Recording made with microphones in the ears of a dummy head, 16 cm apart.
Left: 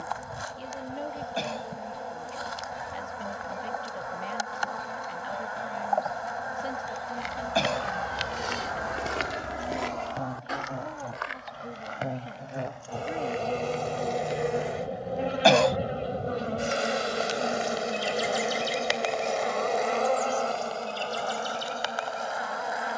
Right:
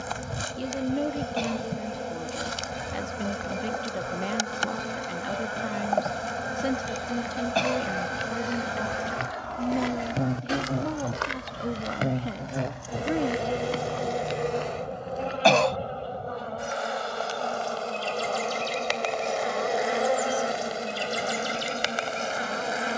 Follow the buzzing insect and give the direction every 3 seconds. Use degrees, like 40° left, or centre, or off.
40° right, 40° right, 40° right, 40° right, 10° right, 20° left, centre, 30° right.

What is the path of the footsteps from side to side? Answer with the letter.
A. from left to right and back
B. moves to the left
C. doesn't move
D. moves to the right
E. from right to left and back
D.